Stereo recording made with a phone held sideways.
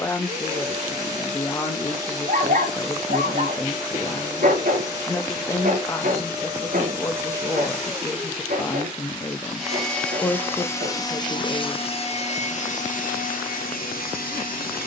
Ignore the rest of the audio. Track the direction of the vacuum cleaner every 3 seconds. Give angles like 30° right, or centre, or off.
30° right, 30° right, 20° right, 20° left, 70° left.